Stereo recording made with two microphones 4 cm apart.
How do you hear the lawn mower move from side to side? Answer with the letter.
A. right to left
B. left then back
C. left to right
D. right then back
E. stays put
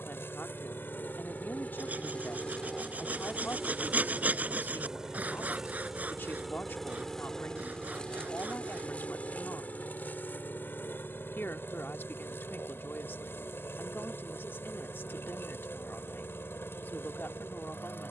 D.